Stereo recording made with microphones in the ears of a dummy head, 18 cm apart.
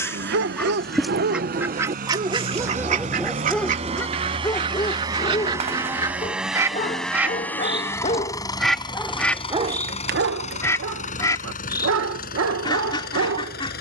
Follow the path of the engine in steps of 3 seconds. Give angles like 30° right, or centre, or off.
50° right, 30° right, 10° left, 40° left, 50° left.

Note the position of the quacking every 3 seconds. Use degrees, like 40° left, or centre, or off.
10° right, 30° right, 10° right, 10° left, 20° left.